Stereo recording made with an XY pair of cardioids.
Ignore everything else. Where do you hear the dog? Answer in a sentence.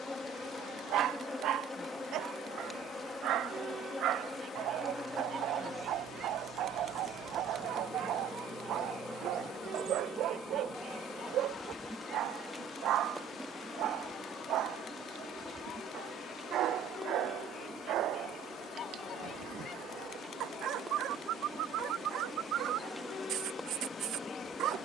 In this clip you hear the dog on the right.